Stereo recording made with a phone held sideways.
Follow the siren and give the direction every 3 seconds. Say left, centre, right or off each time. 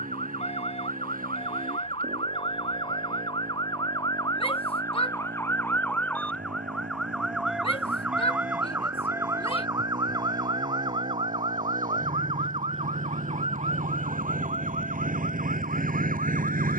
left, left, centre, right, right, right.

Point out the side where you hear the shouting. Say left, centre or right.
left.